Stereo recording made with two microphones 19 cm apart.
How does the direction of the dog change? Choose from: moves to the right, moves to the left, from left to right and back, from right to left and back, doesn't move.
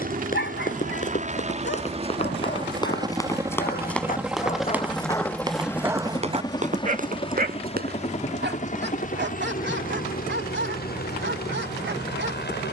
moves to the right.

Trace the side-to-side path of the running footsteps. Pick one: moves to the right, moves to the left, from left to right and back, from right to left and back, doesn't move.
moves to the right.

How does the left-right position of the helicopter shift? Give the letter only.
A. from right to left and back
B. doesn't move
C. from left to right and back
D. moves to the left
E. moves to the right
D.